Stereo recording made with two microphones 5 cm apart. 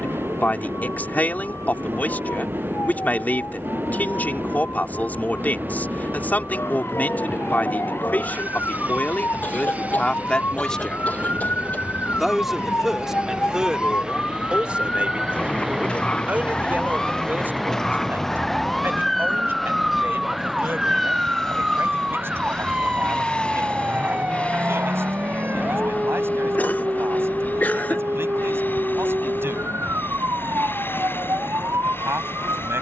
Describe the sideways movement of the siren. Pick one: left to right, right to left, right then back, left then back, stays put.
left to right.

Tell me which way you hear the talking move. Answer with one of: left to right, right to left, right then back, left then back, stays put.
left to right.